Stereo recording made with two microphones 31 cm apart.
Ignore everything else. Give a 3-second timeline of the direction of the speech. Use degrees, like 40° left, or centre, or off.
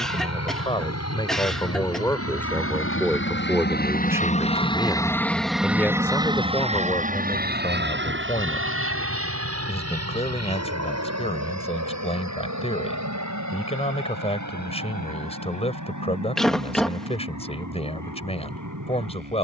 10° left, centre, 20° left, 20° left, 20° left, 20° left, 20° left.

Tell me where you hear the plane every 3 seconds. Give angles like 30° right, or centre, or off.
60° left, 20° left, 30° right, 50° right, 60° right, 60° right, 70° right.